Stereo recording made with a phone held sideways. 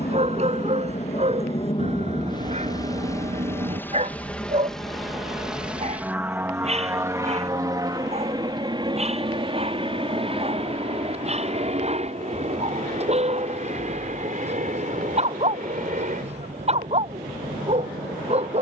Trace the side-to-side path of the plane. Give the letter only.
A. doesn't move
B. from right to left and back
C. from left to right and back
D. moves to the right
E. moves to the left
D.